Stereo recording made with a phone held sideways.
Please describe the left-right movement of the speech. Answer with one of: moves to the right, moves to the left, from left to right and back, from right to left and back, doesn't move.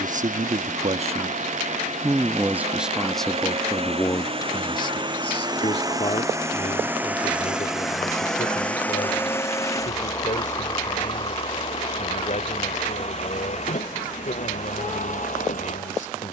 moves to the left.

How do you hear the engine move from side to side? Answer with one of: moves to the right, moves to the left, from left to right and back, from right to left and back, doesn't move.
moves to the left.